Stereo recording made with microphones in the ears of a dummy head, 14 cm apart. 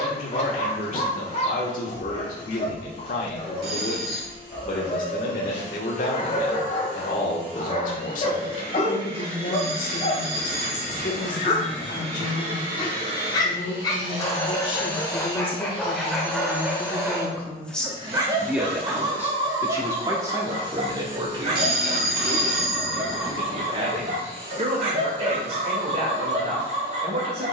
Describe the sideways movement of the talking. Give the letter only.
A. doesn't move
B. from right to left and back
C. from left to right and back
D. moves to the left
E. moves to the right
E.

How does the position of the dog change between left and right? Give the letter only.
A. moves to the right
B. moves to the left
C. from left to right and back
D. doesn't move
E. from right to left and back
A.